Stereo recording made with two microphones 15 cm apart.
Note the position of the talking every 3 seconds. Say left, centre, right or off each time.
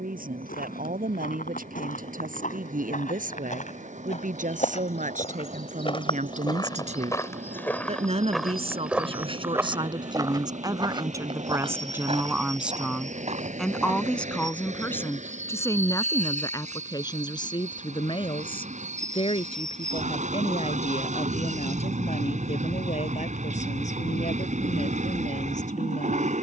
right, right, right, right, centre, left, left, left, left.